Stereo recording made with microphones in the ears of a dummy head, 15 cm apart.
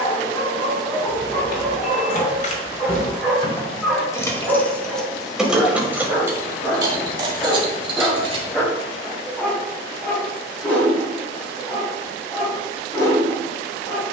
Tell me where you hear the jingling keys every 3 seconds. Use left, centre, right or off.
left, centre, right, off, off.